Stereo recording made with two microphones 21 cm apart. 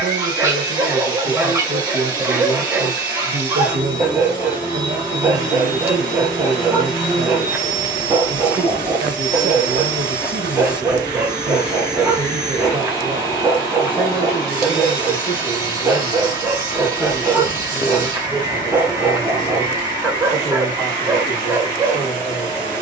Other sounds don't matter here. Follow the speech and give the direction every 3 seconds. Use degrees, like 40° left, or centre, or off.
60° right, 60° right, 60° right, 60° right, 10° right, 10° left, 10° left, 10° left.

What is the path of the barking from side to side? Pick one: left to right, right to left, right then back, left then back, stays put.
stays put.